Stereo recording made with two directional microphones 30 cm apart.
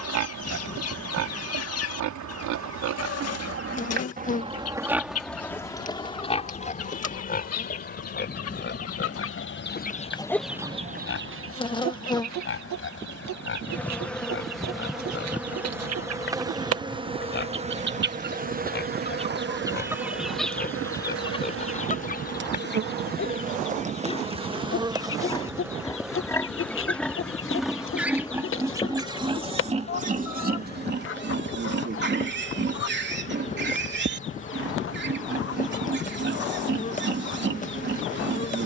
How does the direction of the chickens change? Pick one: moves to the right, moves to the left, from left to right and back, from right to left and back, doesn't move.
from left to right and back.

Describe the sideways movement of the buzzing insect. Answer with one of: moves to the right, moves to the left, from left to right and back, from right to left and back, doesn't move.
from left to right and back.